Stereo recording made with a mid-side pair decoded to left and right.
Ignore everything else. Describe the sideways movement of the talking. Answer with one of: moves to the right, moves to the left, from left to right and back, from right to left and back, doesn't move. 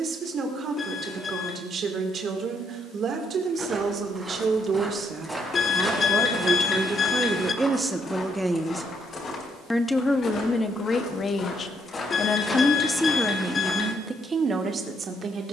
from right to left and back.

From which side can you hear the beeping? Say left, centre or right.
left.